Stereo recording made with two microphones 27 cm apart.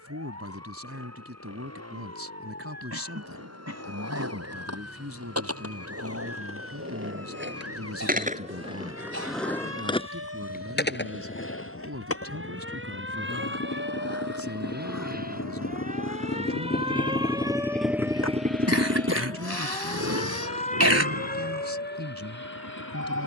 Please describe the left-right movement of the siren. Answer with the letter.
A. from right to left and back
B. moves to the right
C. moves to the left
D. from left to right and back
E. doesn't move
C.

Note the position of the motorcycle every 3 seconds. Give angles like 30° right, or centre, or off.
80° left, 80° left, 70° left, 70° left, 70° left, 40° left, 50° right, 80° right.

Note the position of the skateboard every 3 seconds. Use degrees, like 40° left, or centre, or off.
off, 70° right, 40° right, 30° left, 70° left, 80° left, 80° left, off.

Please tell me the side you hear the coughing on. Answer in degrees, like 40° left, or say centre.
70° right.